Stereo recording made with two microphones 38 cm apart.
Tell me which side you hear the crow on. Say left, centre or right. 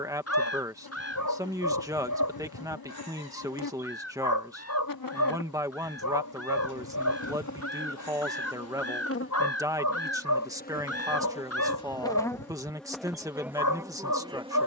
left.